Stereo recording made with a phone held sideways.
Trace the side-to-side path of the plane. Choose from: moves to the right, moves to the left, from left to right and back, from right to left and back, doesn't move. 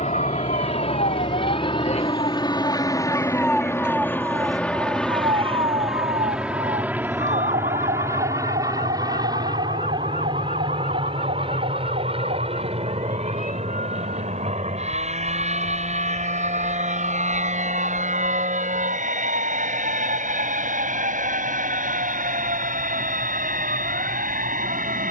moves to the right.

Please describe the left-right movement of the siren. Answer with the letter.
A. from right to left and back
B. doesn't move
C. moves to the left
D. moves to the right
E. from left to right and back
D.